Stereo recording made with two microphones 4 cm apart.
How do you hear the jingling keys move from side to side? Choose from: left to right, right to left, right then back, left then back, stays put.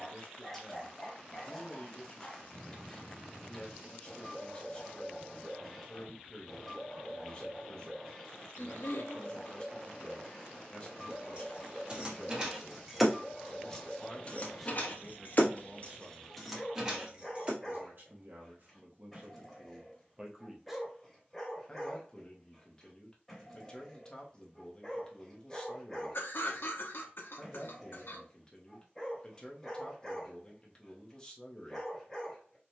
left then back.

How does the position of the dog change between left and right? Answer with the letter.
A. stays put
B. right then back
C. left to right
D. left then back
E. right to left
A.